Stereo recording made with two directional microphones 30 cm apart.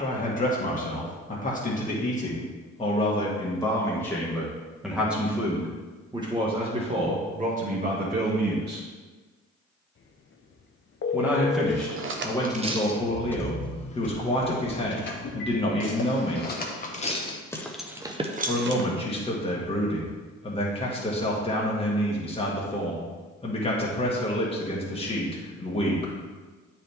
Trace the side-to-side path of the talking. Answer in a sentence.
You can hear the talking move from left to right and back again.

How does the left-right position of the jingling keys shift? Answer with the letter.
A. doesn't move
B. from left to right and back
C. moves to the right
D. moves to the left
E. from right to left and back
E.